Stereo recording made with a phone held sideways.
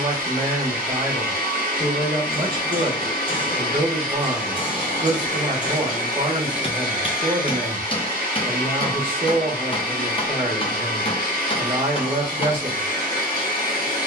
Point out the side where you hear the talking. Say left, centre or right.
right.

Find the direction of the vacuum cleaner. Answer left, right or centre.
left.